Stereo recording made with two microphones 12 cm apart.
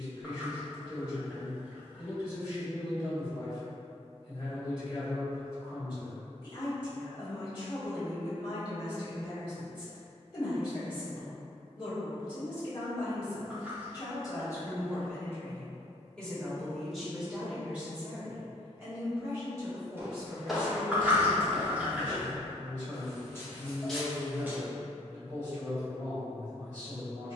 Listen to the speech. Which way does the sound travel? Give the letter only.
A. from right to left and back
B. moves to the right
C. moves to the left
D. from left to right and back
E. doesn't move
B.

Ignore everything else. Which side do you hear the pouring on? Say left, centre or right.
centre.